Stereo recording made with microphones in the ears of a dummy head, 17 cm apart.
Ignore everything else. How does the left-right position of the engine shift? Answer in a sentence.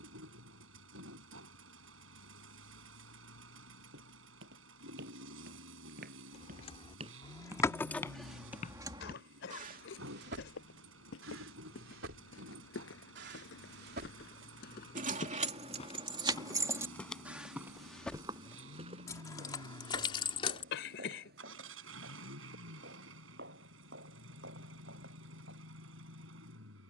In this clip you hear the engine stay in one place.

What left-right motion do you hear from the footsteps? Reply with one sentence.
In this clip you hear the footsteps go left and come back.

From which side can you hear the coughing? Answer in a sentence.
You can hear the coughing on the left.